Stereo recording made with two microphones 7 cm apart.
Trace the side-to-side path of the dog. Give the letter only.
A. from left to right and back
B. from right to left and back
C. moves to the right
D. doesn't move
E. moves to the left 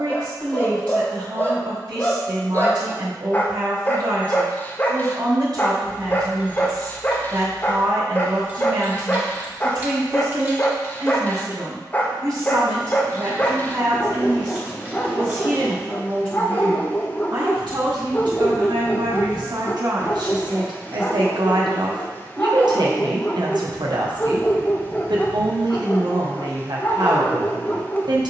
D.